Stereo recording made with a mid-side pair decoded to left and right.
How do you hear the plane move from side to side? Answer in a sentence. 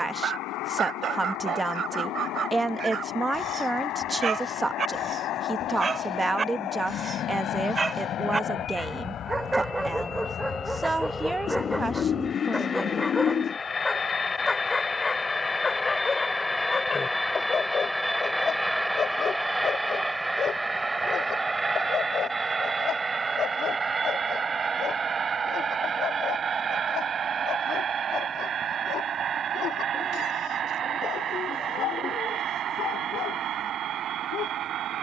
In this clip you hear the plane move from left to right.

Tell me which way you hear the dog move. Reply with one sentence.
In this clip you hear the dog travel towards the left.